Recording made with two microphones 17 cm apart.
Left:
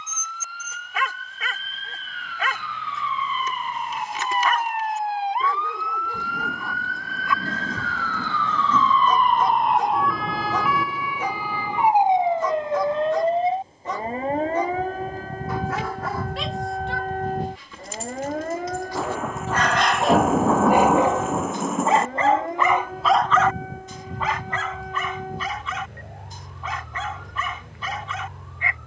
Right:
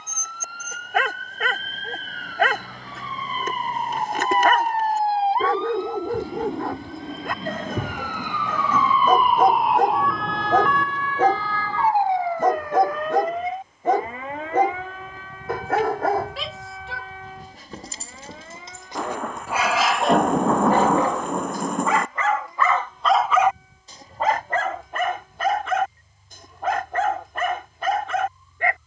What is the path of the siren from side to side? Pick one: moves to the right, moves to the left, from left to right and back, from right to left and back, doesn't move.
moves to the left.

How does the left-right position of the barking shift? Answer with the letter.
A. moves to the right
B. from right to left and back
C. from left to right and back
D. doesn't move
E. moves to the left
B.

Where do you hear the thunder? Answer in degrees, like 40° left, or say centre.
centre.